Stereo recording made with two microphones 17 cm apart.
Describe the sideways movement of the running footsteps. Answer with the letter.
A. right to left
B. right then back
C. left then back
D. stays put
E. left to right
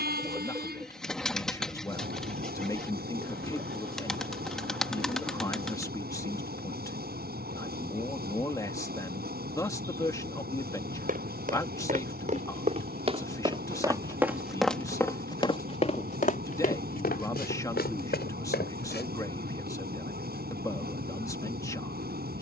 A.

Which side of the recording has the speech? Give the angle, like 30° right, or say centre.
20° left.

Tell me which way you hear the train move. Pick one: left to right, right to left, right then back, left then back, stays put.
stays put.